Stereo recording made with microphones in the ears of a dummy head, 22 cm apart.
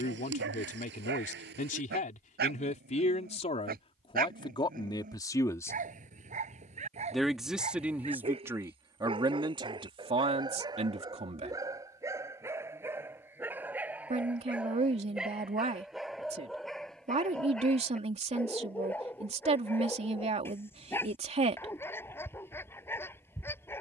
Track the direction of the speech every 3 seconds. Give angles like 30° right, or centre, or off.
30° left, 20° left, 10° right, 20° right, 30° right, 30° right, 30° right, 30° right.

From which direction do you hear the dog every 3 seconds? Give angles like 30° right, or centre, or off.
50° right, 40° right, 30° right, 20° right, 10° right, centre, 10° left, 10° left.